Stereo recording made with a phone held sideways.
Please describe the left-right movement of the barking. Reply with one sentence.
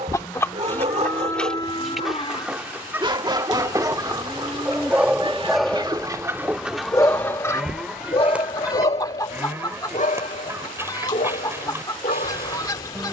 In this clip you hear the barking go from the right side to the left.